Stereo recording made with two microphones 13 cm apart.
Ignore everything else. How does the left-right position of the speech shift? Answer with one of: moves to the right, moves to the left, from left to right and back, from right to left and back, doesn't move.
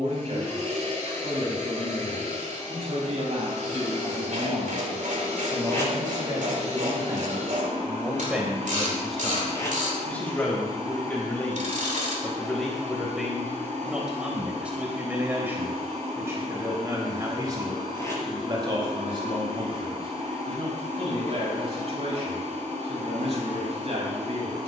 from right to left and back.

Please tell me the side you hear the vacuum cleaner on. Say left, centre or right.
right.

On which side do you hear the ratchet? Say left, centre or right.
right.